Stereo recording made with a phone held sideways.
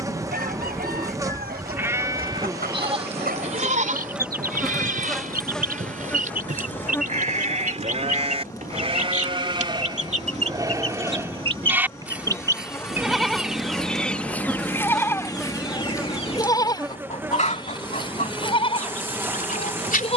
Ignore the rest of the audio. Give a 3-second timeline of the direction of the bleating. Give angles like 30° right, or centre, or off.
20° right, 50° right, 50° right, 20° right, centre, 20° left, 40° left.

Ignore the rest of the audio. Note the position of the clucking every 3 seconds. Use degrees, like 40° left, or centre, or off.
70° right, 70° right, 60° right, 40° right, centre, 40° left, 60° left.